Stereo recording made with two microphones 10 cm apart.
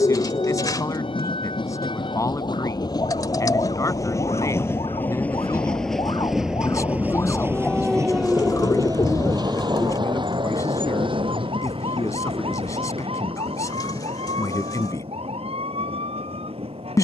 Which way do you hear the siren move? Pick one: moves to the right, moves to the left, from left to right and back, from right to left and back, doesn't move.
moves to the right.